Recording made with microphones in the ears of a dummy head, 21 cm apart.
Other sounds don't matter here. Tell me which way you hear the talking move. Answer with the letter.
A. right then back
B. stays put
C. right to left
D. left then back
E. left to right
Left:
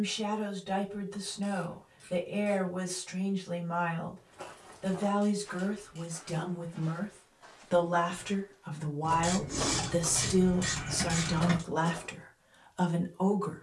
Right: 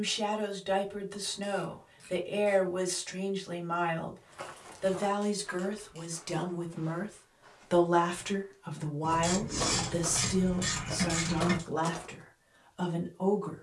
C.